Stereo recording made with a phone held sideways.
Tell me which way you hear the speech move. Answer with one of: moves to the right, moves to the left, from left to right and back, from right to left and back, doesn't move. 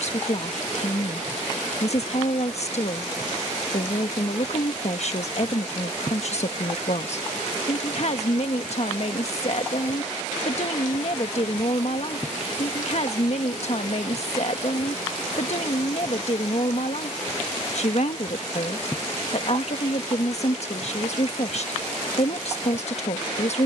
doesn't move.